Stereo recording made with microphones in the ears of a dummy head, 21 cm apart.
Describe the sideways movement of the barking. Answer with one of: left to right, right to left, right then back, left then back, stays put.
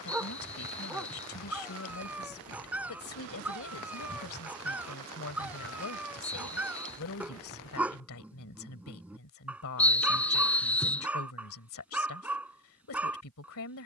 stays put.